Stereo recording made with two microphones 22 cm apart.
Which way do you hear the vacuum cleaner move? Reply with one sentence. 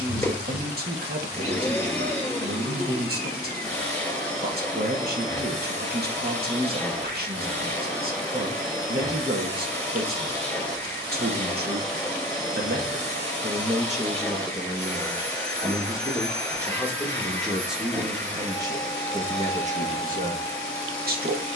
In this clip you hear the vacuum cleaner stay put.